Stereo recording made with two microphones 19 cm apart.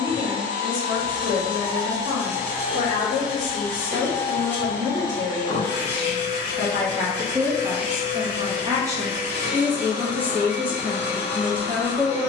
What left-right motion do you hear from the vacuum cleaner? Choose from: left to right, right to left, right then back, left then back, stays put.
right to left.